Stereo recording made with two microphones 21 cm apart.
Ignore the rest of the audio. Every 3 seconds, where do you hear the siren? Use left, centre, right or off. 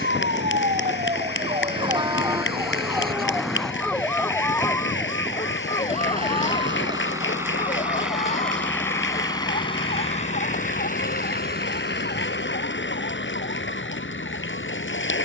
right, centre, left, left, left.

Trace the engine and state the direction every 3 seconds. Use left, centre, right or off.
right, right, centre, left, left.